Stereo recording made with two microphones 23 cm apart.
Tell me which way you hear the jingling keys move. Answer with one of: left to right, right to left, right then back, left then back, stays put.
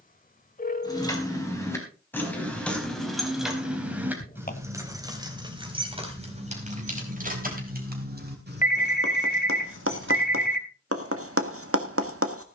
left to right.